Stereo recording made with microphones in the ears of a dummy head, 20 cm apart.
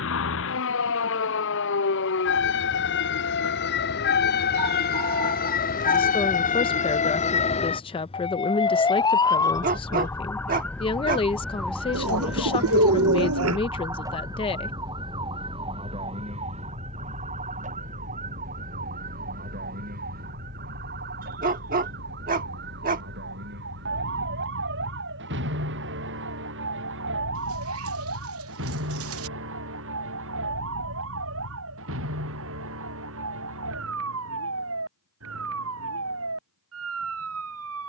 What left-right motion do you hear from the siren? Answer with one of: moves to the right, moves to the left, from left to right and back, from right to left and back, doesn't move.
moves to the right.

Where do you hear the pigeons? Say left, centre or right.
right.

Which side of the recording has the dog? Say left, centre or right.
right.